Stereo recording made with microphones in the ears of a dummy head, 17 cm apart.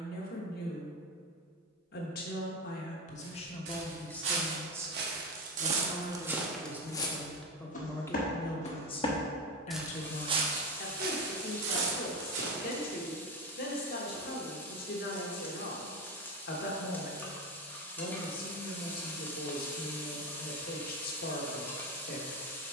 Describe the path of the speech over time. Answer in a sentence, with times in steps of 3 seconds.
In this clip you hear the speech on the left from 0 s, in the centre from 3 s and on the left from 9 s.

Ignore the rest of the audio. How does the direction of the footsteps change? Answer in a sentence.
In this clip you hear the footsteps go left and come back.